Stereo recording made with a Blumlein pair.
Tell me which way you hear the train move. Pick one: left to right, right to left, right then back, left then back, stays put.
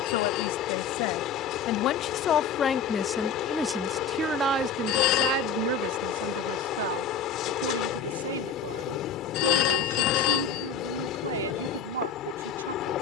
stays put.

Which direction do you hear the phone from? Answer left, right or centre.
left.